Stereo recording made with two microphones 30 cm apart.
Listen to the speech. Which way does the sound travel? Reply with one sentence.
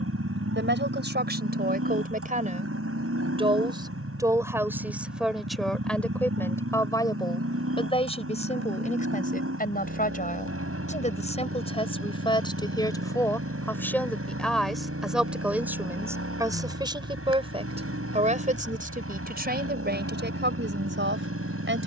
You can hear the speech move from right to left and back again.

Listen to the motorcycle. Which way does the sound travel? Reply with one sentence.
You can hear the motorcycle stay put.